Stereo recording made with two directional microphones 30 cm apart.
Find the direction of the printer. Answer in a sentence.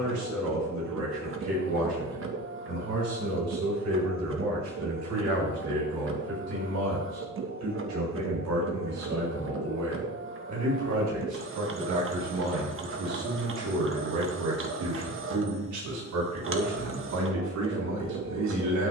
You can hear the printer on the right.